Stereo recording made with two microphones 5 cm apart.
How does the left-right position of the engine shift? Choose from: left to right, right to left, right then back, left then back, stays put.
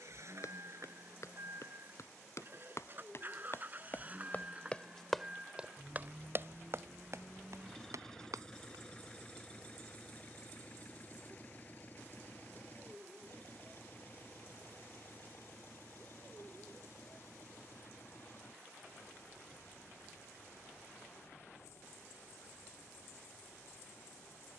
right to left.